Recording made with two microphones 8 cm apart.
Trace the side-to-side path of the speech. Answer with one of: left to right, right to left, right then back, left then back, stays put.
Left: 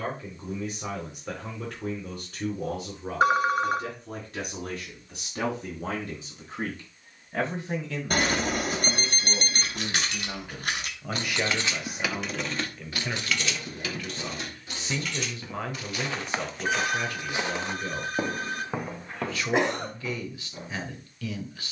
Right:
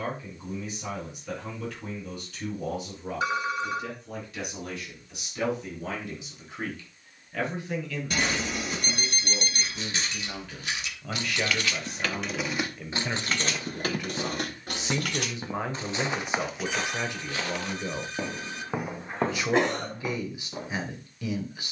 left to right.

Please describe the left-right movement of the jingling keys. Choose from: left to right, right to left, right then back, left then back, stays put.
left to right.